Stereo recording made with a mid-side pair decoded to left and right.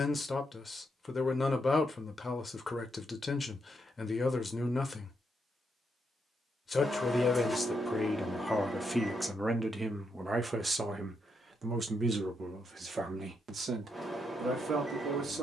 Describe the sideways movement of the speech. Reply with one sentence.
In this clip you hear the speech go from the left side to the right.